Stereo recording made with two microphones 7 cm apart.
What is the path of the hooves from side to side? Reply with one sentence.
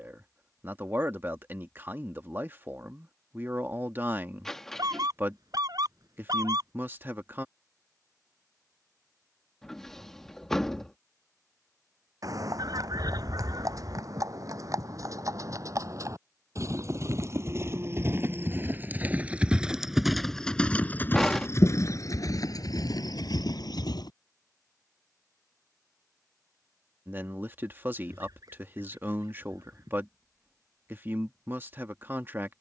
In this clip you hear the hooves move from right to left.